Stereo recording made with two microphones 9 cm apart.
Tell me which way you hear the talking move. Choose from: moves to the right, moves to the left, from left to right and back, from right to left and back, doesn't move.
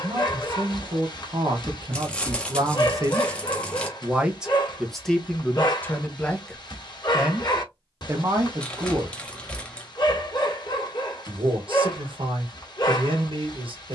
from right to left and back.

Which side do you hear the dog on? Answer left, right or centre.
left.